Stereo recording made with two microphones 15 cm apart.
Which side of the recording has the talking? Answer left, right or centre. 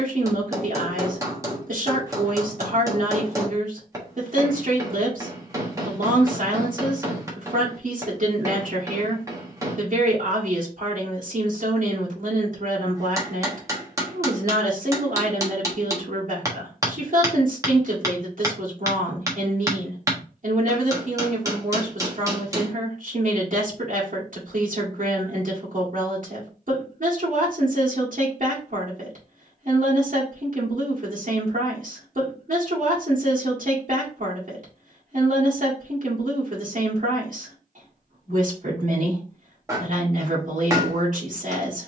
right.